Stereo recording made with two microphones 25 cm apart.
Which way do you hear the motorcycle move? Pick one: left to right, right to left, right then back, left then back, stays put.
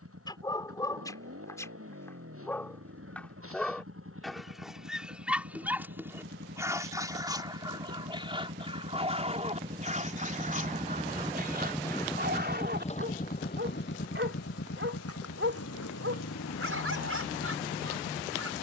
right to left.